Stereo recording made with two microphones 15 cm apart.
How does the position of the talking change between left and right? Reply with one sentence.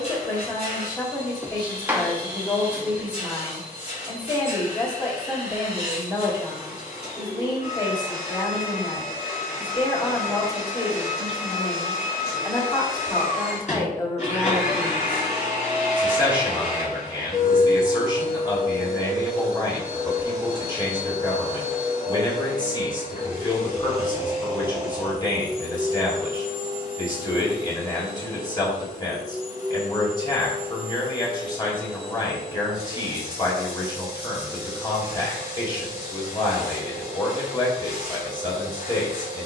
You can hear the talking stay in one place.